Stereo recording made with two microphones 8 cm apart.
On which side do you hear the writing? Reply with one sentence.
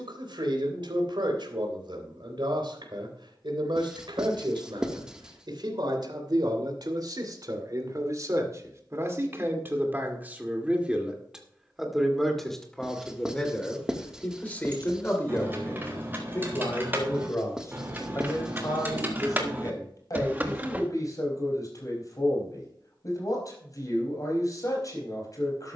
You can hear the writing in the centre.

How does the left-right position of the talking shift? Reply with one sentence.
You can hear the talking move to the left.